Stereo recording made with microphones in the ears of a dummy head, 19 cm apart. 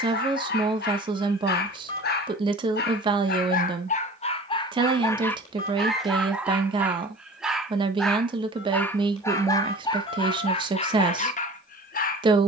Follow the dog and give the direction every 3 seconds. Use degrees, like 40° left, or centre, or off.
50° left, 30° left, centre, 30° left.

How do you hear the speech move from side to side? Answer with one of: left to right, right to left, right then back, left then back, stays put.
stays put.